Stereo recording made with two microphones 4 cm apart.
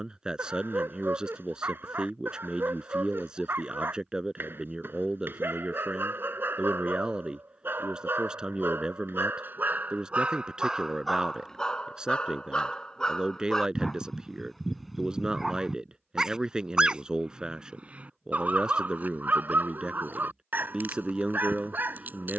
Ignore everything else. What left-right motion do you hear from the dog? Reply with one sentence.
In this clip you hear the dog move from right to left and back again.